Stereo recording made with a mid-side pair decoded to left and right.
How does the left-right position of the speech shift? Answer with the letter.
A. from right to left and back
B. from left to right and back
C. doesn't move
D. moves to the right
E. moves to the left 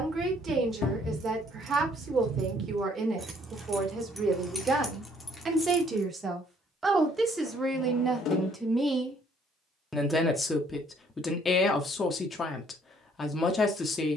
E.